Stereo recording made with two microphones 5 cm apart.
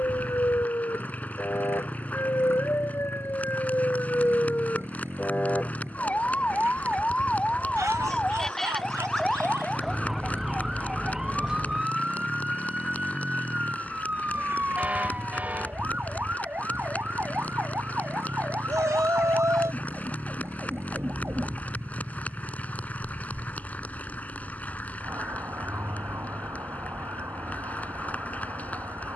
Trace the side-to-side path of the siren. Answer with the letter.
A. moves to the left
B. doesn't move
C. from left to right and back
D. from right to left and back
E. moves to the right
E.